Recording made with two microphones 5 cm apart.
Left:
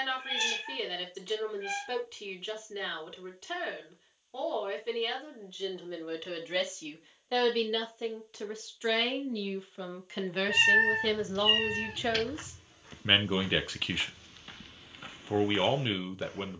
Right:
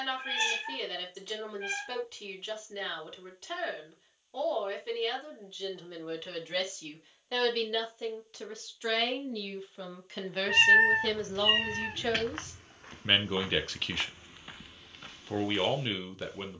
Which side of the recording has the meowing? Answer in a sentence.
In this clip you hear the meowing on the right.